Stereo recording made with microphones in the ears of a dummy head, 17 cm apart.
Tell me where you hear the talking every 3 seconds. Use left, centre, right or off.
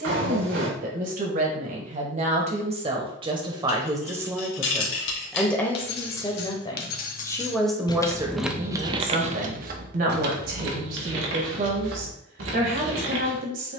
right, centre, centre, right, right.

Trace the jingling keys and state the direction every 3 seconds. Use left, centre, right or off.
off, left, left, right, right.